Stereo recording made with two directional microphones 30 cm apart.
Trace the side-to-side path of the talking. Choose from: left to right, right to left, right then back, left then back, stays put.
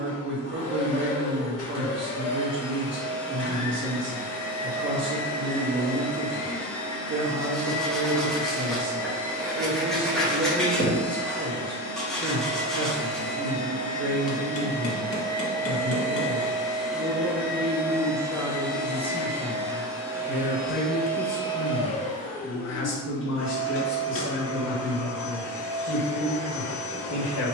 right to left.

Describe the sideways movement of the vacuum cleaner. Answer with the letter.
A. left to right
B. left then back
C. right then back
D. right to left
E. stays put
C.